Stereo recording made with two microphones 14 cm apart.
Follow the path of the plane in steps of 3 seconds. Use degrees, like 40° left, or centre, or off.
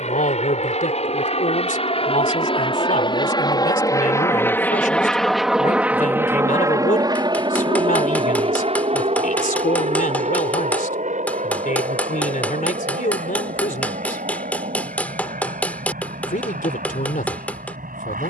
50° left, 10° left, 30° right, 60° right, 70° right, 70° right.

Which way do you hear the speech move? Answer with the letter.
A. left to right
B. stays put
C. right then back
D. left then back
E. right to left
B.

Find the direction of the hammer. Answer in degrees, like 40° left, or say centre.
10° left.